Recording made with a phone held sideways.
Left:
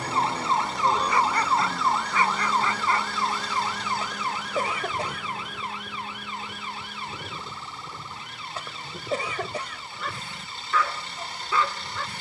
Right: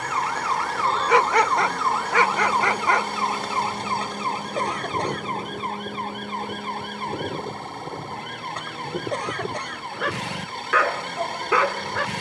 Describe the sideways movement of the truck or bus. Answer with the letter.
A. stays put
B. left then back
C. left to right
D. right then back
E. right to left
A.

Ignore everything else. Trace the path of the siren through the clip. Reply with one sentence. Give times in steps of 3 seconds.
You can hear the siren in the centre from 0 s and on the right from 3 s.